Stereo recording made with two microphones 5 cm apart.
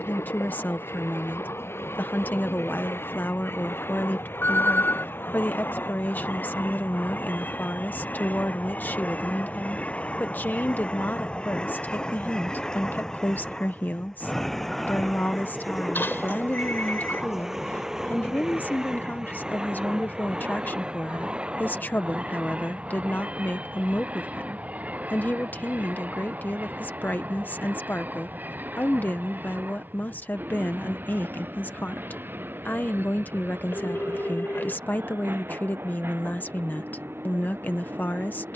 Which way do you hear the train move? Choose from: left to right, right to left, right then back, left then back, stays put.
left to right.